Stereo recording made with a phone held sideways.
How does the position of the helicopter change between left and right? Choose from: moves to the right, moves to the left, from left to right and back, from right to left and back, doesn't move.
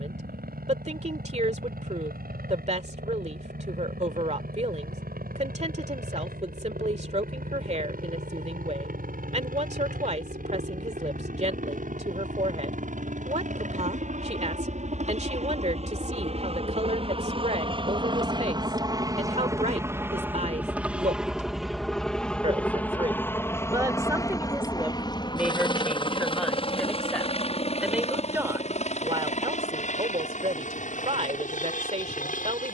moves to the left.